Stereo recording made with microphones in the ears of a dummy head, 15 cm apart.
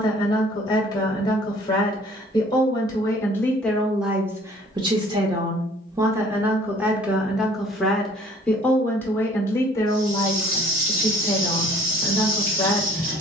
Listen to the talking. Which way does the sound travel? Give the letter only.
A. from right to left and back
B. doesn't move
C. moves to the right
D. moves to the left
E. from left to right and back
E.